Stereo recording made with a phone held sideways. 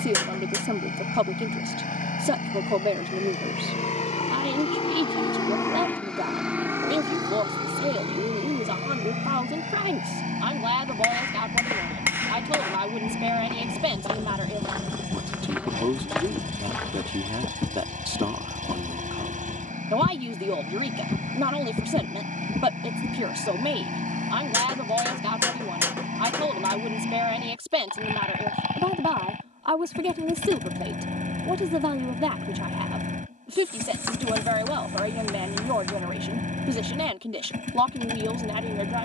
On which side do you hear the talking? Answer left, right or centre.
right.